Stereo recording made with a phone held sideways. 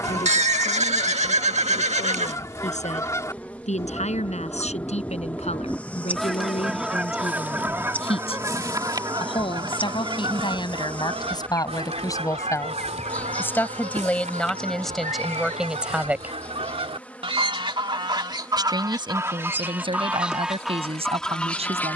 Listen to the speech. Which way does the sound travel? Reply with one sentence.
In this clip you hear the speech move from left to right.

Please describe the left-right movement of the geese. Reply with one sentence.
You can hear the geese go right and come back.